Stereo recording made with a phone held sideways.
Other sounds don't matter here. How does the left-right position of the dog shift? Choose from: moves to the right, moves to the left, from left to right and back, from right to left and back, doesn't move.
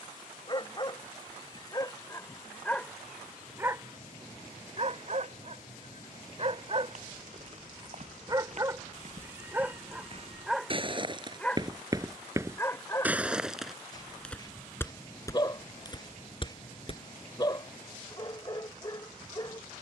from left to right and back.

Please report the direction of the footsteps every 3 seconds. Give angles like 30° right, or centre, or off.
off, off, 50° right, 40° right, centre, 30° left, off.